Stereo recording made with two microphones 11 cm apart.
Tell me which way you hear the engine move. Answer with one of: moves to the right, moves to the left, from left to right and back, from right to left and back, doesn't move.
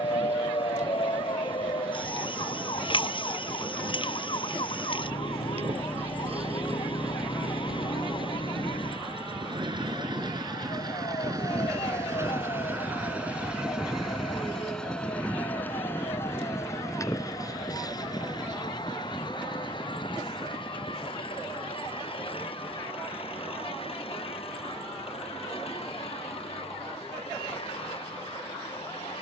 moves to the left.